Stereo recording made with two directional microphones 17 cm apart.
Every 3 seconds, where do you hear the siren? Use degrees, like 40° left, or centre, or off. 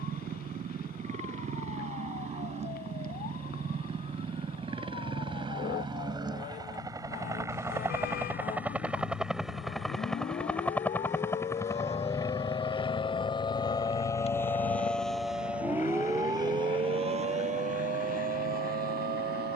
60° left, 60° left, 60° left, 50° left, 20° left, 20° right, 60° right.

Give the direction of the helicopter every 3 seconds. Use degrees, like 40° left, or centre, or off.
50° right, 30° right, 20° right, 10° left, 30° left, 50° left, 60° left.